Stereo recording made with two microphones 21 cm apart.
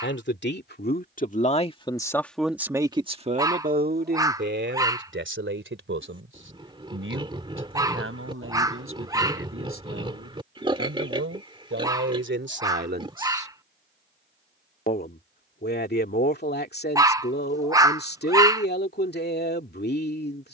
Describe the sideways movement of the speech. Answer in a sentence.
In this clip you hear the speech move from left to right and back again.